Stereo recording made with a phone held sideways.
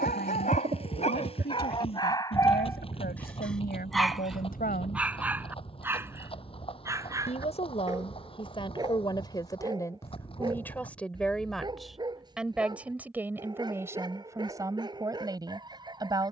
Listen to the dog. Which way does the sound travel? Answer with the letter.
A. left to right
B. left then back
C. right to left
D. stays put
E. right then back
A.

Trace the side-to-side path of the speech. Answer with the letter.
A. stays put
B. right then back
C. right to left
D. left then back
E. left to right
E.